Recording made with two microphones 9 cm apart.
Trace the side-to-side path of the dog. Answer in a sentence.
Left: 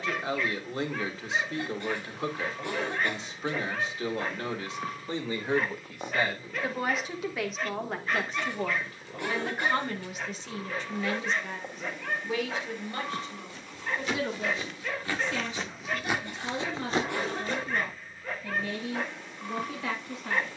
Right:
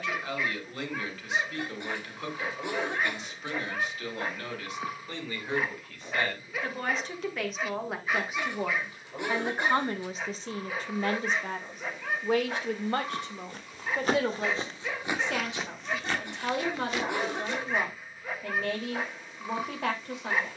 You can hear the dog stay in one place.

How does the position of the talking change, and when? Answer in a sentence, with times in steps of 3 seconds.
You can hear the talking on the left from 0 s, in the centre from 6 s and on the right from 9 s.